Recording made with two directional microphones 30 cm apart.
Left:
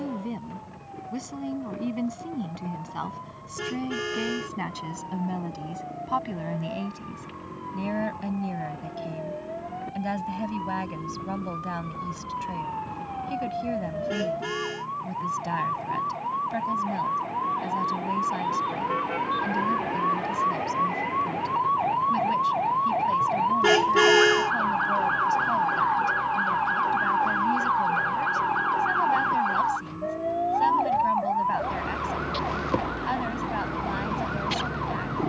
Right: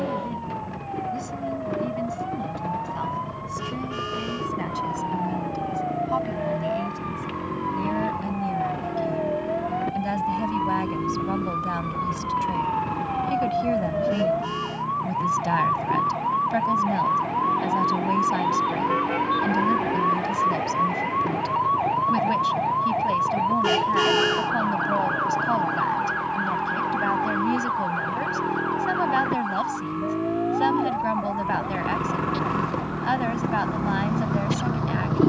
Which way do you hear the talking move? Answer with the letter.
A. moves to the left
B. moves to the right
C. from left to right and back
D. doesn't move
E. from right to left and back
B.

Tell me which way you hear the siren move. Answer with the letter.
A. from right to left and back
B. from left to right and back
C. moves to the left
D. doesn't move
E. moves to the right
C.